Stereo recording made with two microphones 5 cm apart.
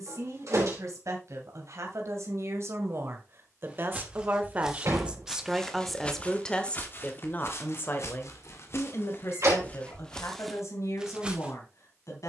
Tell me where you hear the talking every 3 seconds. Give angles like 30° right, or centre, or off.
60° right, 30° right, 30° left, 60° left.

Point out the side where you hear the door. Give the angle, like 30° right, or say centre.
70° right.